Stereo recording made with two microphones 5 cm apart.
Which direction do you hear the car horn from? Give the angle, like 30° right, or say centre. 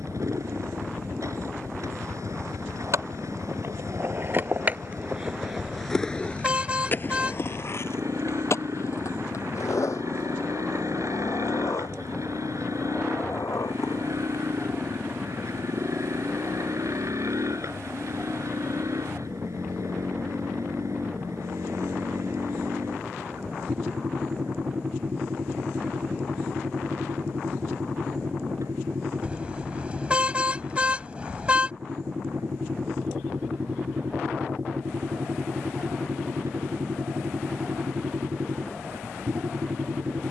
20° right.